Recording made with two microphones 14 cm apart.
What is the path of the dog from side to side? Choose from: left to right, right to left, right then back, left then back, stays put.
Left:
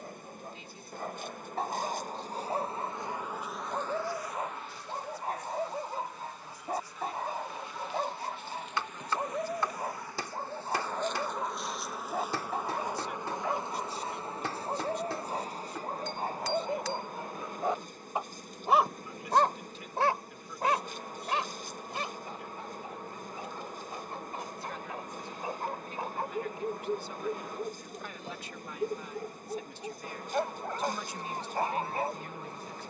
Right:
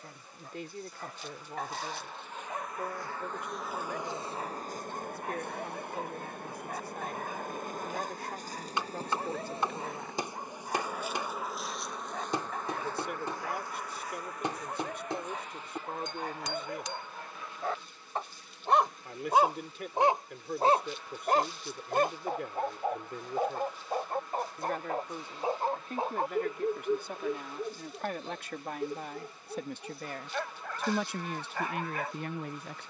right then back.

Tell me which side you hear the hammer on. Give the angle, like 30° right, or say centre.
20° right.